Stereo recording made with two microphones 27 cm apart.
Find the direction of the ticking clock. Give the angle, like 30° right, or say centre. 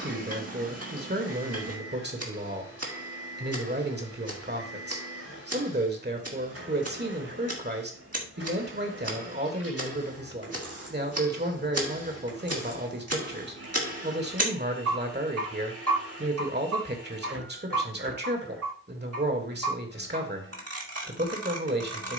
60° right.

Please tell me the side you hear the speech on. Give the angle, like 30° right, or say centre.
40° right.